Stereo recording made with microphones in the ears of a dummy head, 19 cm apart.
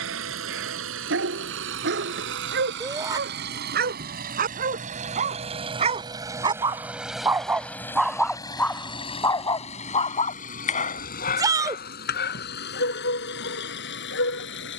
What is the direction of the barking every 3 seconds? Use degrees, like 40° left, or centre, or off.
60° right, 40° right, 10° right, 40° left, 60° left.